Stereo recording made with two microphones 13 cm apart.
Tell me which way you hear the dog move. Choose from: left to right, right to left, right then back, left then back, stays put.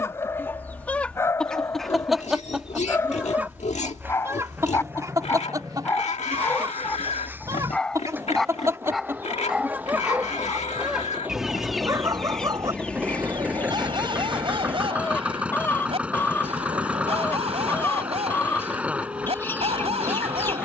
left to right.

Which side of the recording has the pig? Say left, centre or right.
left.